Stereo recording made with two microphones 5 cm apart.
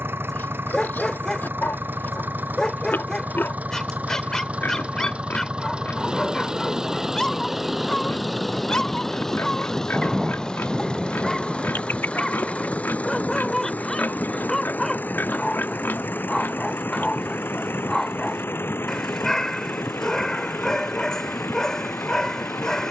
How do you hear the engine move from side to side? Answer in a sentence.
You can hear the engine move from right to left.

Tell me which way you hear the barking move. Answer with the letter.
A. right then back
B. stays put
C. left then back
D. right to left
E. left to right
B.